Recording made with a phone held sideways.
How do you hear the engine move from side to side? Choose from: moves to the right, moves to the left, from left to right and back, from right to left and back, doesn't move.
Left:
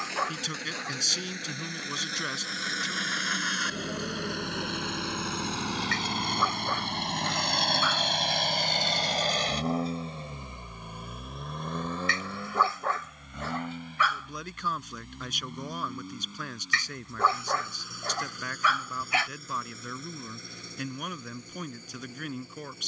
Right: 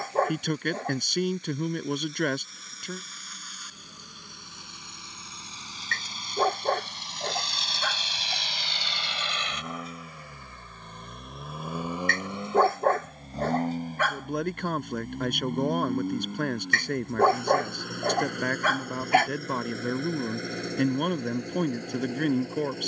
moves to the right.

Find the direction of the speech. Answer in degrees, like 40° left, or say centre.
60° right.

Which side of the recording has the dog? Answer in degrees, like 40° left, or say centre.
50° right.